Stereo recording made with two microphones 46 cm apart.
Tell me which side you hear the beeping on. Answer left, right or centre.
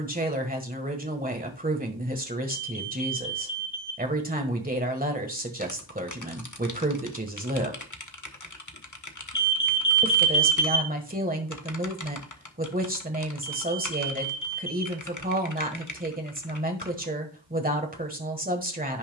left.